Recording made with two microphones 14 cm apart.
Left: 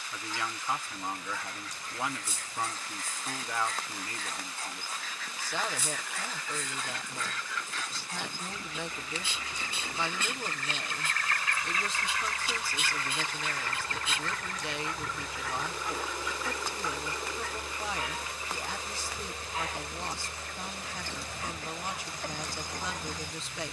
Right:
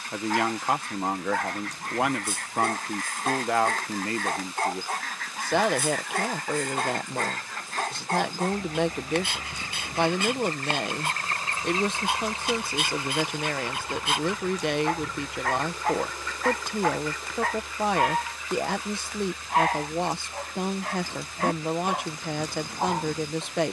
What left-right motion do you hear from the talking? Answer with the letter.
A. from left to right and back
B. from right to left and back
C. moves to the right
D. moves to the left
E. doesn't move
E.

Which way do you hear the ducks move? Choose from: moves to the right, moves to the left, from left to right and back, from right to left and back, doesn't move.
moves to the left.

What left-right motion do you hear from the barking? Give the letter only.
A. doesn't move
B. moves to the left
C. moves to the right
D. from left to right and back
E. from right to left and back
A.